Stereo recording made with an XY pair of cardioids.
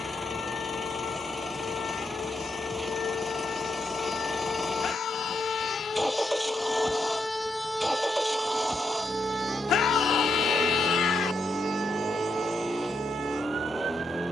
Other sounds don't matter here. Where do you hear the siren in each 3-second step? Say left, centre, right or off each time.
left, left, centre, right, right.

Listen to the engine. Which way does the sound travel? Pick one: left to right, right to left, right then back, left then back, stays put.
stays put.